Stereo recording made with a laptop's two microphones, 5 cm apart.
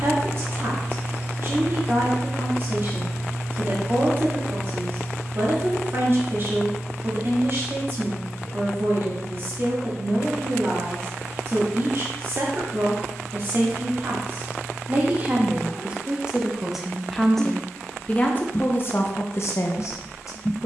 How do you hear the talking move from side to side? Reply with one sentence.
In this clip you hear the talking travel towards the left.